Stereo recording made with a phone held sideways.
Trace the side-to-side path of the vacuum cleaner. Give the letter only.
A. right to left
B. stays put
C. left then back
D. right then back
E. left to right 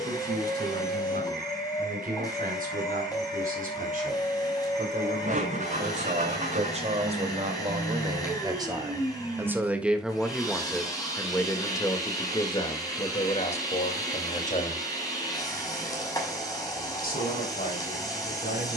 B.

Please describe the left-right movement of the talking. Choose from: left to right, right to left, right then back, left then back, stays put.
right to left.